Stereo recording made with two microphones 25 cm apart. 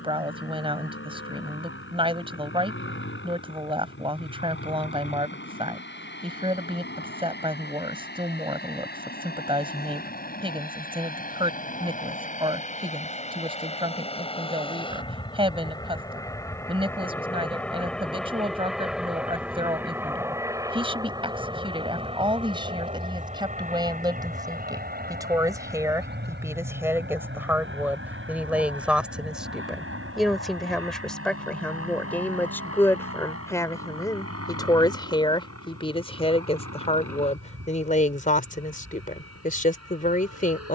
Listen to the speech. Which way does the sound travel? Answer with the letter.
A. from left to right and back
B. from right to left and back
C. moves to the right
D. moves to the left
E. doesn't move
D.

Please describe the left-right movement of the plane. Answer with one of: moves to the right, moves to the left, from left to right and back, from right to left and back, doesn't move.
moves to the right.